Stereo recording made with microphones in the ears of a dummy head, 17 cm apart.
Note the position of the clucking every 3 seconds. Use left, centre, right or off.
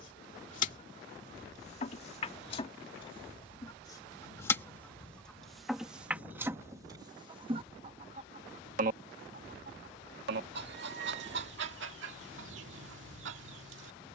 left, centre, right, right, right.